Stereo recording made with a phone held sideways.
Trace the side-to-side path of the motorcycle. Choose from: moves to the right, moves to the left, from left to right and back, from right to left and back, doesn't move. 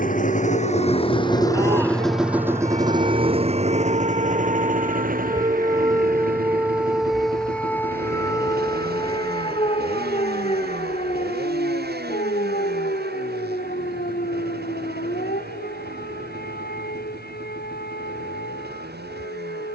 moves to the right.